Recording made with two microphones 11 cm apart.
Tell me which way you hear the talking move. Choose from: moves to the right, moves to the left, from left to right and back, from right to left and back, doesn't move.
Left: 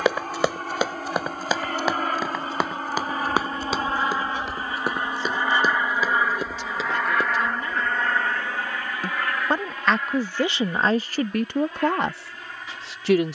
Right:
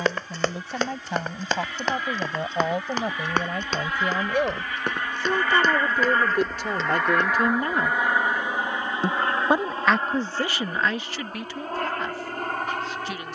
moves to the left.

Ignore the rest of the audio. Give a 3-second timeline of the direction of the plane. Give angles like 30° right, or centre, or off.
50° left, 30° left, centre, 30° right, 50° right.